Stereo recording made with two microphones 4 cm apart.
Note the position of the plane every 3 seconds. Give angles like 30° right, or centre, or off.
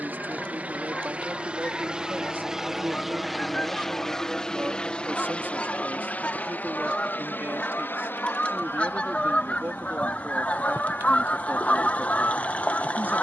30° right, 10° left, 40° left, 60° left, 60° left.